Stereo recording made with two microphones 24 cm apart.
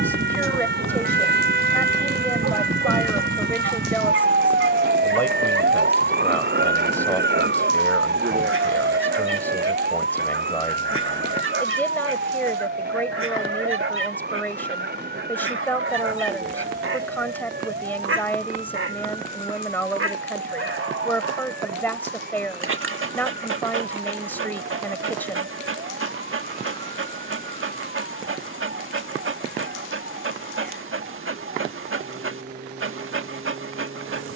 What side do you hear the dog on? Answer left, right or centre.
right.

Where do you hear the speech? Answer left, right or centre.
centre.